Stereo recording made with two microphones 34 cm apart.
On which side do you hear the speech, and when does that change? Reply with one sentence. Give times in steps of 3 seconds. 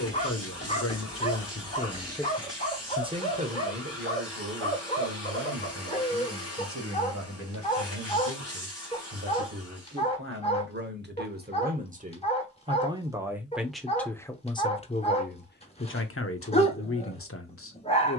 You can hear the speech on the left from 0 s, on the right from 3 s, in the centre from 12 s and on the left from 15 s.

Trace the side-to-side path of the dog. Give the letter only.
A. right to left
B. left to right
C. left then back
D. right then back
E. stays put
E.